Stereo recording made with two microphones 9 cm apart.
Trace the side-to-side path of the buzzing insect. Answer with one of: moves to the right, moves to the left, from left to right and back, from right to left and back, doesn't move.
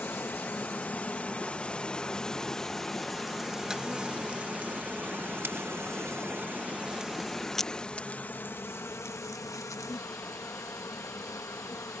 from left to right and back.